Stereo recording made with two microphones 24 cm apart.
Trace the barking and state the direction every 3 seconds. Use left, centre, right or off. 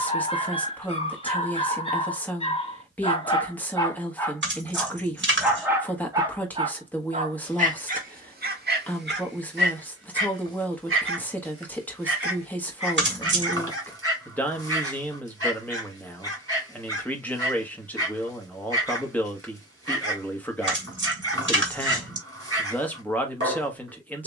left, centre, right, right, right, right, right, right.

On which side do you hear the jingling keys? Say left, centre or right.
right.